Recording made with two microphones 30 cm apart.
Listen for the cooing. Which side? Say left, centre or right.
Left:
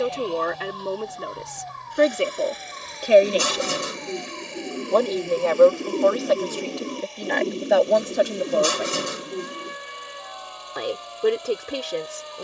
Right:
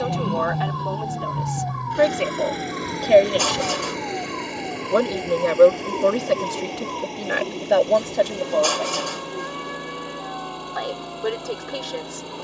left.